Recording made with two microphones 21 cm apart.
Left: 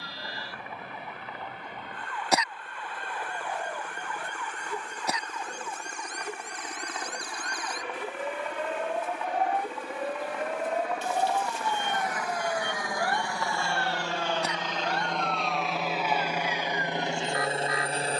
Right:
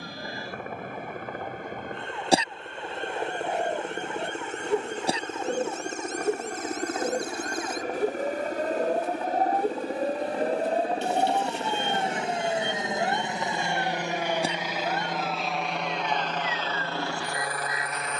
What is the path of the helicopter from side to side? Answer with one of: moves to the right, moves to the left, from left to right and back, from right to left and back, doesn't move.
moves to the left.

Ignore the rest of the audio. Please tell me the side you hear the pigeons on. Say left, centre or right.
right.